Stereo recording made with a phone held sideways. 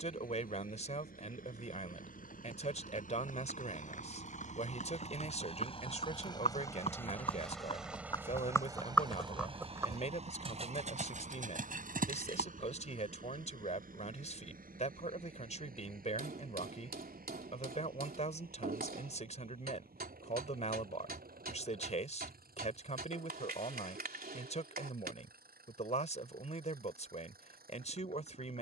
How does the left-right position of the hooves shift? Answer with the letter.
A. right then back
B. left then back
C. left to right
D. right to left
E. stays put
C.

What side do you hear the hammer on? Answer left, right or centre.
right.